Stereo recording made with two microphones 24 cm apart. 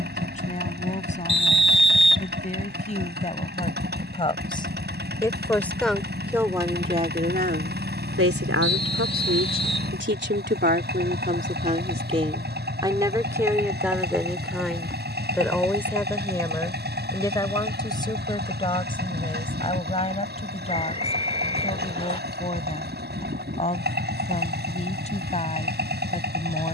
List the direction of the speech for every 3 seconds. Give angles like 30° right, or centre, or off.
30° left, 20° left, 40° right, 40° right, 10° right, 10° left, 20° left, 30° left, 30° left.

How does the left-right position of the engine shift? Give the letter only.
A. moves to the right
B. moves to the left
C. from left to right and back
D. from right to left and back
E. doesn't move
E.